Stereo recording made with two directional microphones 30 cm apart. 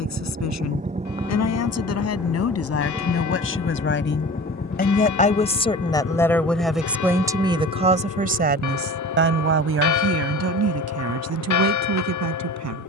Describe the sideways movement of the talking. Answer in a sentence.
You can hear the talking move from left to right.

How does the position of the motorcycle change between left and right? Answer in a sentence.
You can hear the motorcycle move from right to left.